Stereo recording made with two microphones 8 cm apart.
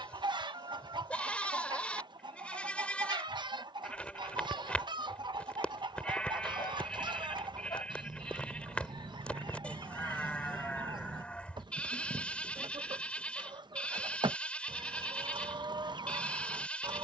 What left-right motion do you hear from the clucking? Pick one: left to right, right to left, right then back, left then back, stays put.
stays put.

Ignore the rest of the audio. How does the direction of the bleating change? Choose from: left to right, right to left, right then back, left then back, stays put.
stays put.